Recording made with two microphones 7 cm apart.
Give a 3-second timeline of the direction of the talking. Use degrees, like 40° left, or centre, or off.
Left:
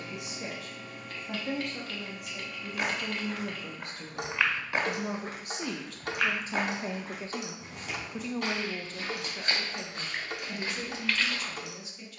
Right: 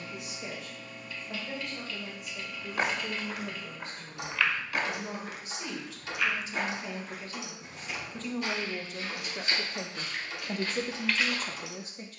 70° left, 60° left, 20° left, 30° right.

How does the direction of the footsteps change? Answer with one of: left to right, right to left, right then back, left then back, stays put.
left then back.